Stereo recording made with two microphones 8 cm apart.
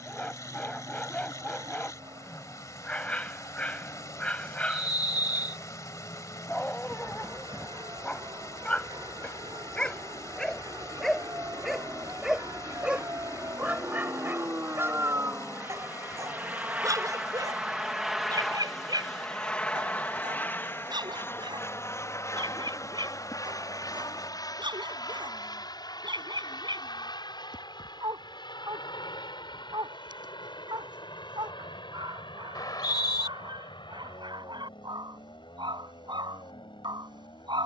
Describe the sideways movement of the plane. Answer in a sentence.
You can hear the plane go from the right side to the left.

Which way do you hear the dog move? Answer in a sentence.
In this clip you hear the dog move to the right.